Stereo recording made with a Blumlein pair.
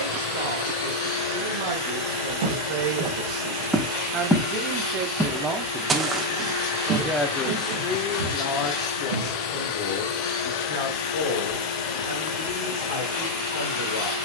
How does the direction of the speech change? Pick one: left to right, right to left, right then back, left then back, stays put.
right to left.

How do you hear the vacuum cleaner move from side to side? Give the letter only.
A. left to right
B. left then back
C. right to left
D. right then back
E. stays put
E.